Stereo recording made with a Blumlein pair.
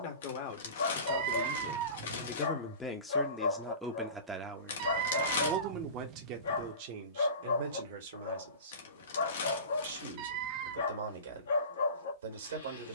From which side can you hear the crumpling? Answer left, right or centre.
left.